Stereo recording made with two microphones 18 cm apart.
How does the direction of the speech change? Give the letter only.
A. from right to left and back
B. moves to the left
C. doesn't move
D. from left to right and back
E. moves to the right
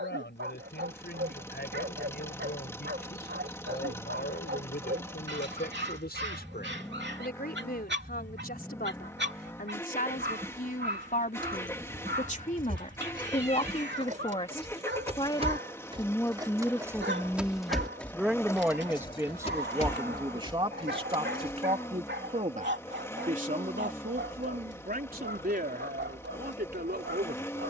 E.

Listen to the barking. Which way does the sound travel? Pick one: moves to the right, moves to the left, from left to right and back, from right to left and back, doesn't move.
doesn't move.